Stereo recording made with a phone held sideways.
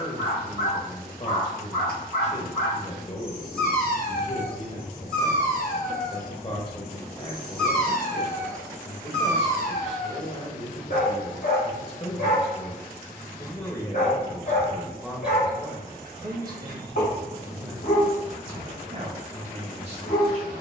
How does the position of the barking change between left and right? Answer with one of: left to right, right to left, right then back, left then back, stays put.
stays put.